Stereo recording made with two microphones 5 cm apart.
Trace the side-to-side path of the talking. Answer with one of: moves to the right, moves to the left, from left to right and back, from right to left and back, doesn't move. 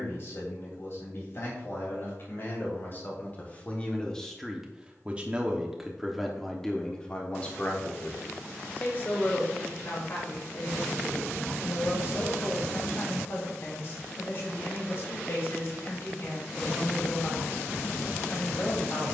from left to right and back.